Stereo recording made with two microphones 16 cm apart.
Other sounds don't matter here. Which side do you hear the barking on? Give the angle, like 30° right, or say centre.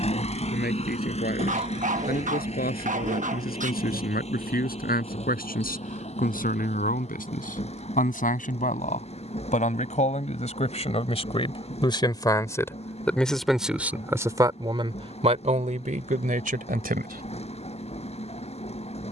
50° right.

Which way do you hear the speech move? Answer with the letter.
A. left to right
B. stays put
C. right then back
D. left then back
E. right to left
A.